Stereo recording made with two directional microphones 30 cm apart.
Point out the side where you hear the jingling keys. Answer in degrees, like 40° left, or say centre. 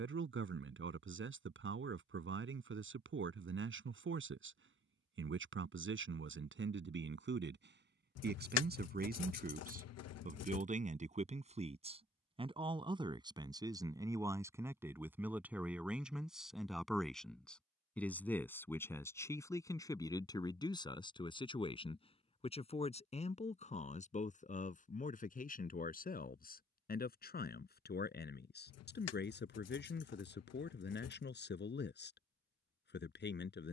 60° left.